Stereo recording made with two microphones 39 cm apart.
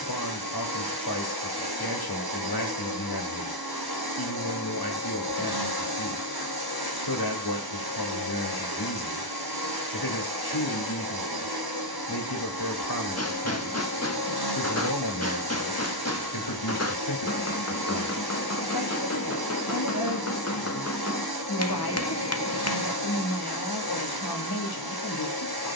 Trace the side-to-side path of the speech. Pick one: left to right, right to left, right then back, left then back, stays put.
stays put.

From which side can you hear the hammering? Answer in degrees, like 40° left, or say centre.
40° left.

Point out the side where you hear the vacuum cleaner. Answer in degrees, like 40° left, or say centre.
80° right.